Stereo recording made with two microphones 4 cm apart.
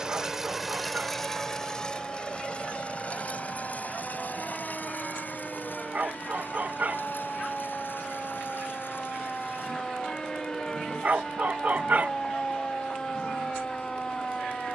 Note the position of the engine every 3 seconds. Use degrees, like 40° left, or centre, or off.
10° left, 50° left, 60° left, 60° left, 70° left.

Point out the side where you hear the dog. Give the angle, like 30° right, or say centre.
40° right.